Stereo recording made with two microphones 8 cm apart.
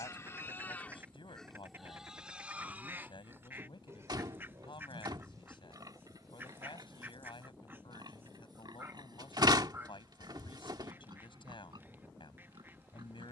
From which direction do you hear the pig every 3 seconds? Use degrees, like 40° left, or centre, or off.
centre, 40° right, 50° right, 60° right, 60° right.